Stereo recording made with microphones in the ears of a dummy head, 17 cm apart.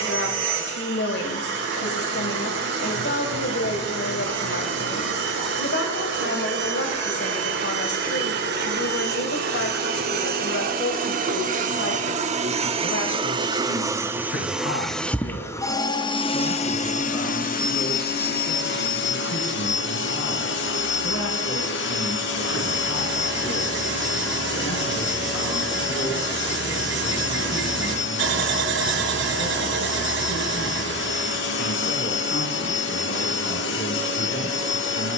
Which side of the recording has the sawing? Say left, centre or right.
right.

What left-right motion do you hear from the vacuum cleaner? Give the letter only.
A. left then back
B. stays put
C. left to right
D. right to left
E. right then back
D.